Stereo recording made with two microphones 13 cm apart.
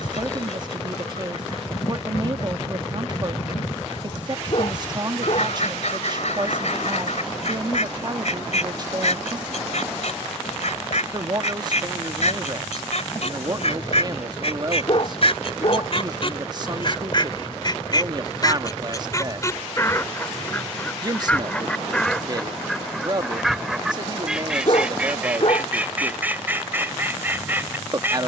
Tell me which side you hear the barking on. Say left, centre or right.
left.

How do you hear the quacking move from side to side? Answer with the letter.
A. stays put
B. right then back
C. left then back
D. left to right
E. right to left
D.